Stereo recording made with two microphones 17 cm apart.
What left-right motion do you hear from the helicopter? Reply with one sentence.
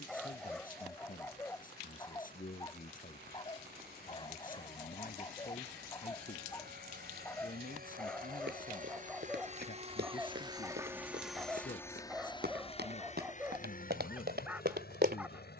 In this clip you hear the helicopter travel towards the left.